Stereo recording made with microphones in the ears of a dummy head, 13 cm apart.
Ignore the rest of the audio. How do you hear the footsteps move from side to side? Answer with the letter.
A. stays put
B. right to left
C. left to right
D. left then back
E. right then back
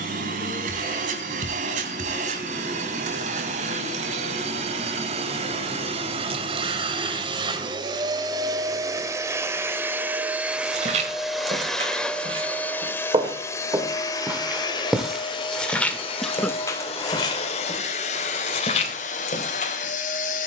B.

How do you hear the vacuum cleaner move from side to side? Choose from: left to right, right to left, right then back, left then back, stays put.
right to left.